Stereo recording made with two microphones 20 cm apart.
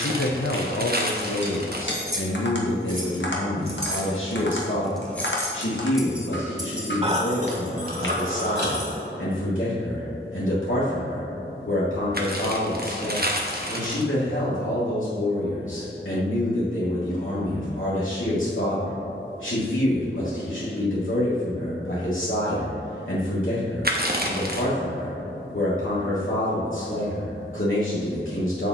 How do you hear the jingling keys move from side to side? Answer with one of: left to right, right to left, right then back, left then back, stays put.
left then back.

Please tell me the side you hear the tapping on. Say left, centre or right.
left.